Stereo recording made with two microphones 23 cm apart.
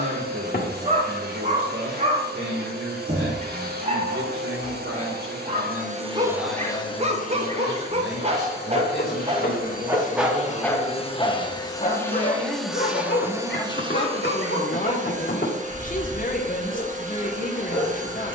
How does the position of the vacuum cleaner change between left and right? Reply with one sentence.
In this clip you hear the vacuum cleaner move from right to left and back again.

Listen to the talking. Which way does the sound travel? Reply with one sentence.
You can hear the talking travel towards the left.